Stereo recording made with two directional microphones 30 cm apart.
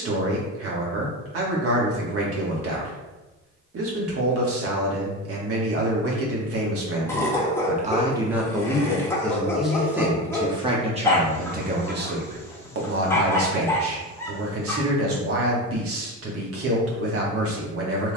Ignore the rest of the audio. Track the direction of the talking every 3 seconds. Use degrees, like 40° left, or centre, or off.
50° right, 50° right, 30° right, 10° right, 50° right, 50° right.